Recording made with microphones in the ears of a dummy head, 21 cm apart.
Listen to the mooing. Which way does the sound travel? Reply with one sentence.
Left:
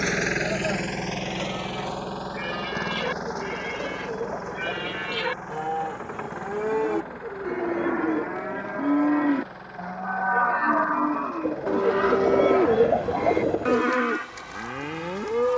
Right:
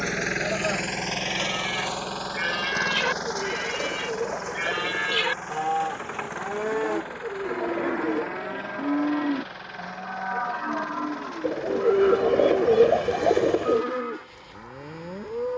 You can hear the mooing move from right to left.